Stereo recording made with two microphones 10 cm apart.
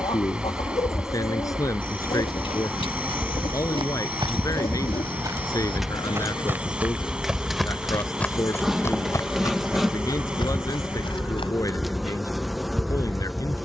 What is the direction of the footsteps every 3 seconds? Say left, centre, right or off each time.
right, right, centre, left, off.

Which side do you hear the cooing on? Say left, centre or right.
left.